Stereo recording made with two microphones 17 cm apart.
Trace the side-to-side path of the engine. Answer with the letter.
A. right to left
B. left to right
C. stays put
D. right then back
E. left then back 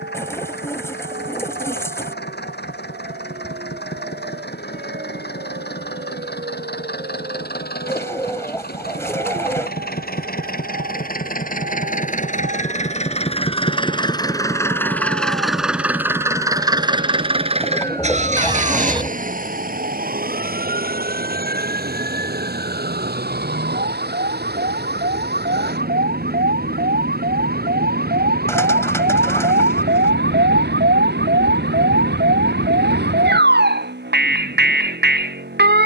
B.